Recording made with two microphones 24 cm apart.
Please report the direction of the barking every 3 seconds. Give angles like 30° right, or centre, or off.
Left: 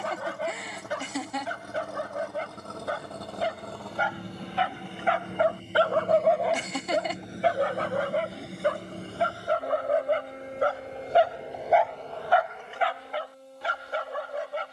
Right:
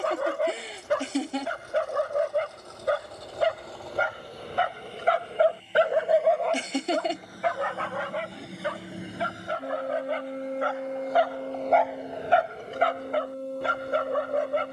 70° right, 50° right, 30° left, 40° left, 50° right.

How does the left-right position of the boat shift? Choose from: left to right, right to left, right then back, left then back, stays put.
left to right.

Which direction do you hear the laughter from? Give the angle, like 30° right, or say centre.
30° right.